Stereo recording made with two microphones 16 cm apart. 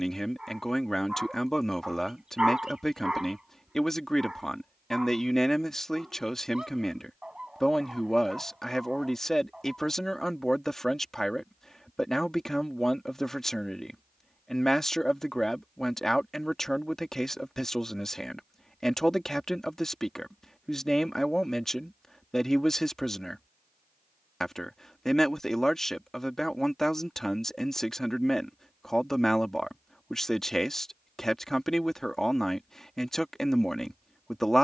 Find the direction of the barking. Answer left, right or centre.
centre.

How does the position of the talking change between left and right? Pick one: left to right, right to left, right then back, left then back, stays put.
stays put.